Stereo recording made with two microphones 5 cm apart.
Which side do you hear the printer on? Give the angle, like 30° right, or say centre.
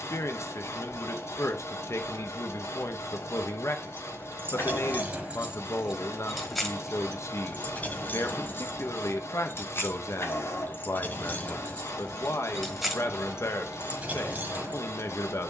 70° left.